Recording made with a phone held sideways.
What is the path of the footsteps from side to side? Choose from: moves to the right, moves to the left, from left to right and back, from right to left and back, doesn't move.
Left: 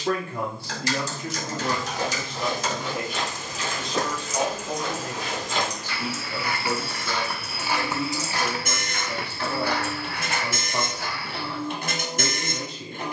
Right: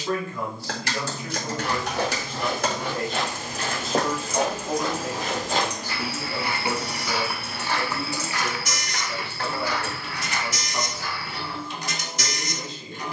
moves to the left.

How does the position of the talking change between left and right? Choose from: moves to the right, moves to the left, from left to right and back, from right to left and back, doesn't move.
from left to right and back.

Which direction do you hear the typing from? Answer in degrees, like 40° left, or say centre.
60° right.